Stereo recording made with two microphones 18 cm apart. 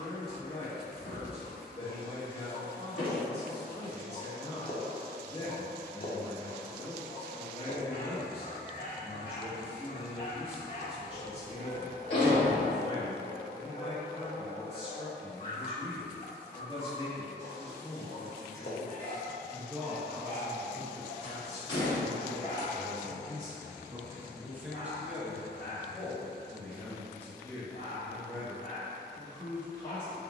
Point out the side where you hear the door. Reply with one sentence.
You can hear the door on the left.